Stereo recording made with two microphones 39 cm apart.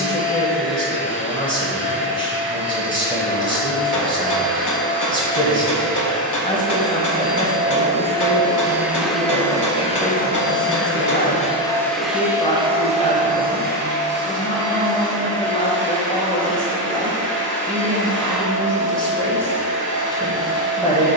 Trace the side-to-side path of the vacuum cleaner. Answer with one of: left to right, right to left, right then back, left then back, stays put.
left then back.